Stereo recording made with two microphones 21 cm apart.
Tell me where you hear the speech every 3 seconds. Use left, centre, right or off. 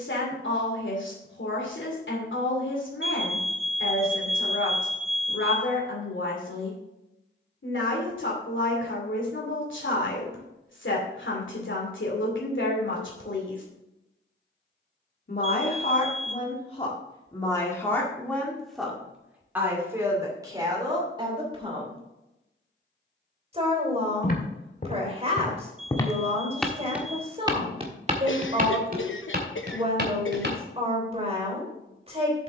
left, left, left, left, left, left, centre, right, right, right, right.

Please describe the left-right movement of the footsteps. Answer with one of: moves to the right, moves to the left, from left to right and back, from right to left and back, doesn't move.
moves to the right.